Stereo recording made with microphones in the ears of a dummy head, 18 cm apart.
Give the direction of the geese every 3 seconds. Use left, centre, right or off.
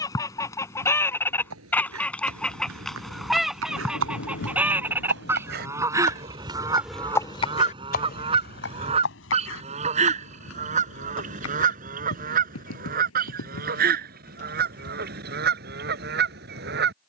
centre, centre, right, right, right, right.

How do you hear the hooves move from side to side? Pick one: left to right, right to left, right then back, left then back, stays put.
right to left.